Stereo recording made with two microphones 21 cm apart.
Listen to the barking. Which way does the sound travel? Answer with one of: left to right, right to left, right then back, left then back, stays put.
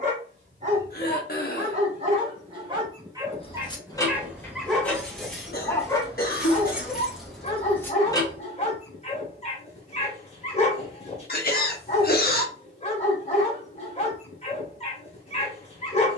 right to left.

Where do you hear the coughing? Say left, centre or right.
left.